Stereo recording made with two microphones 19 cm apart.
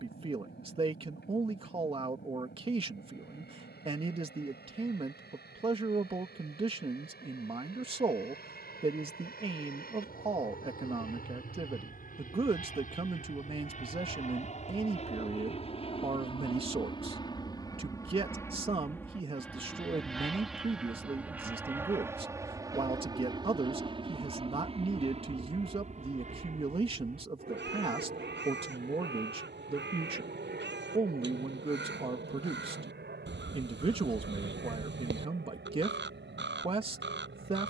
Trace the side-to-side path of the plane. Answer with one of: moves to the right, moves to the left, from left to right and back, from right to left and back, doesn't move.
moves to the right.